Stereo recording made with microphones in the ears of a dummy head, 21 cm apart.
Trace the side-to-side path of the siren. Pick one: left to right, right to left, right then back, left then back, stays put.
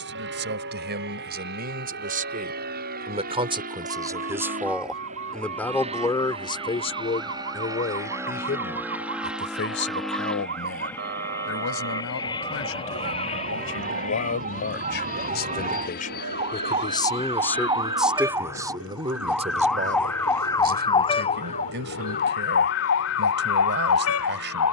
right to left.